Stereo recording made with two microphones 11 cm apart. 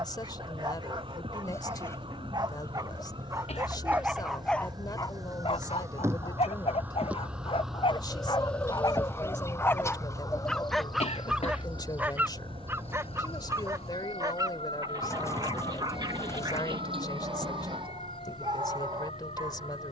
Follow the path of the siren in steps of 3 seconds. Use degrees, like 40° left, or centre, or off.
50° right, 40° right, 10° right, 30° left, 60° left, 70° left, 80° left.